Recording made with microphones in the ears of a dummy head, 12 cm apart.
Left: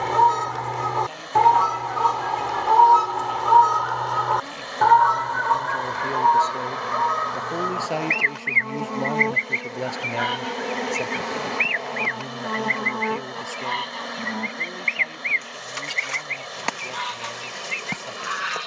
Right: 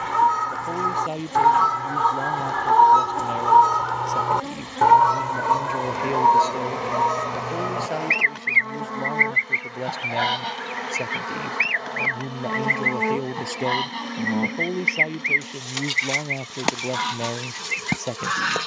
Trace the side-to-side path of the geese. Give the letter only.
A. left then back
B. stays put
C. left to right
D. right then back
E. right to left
C.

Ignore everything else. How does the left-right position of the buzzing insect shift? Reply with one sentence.
In this clip you hear the buzzing insect move from right to left and back again.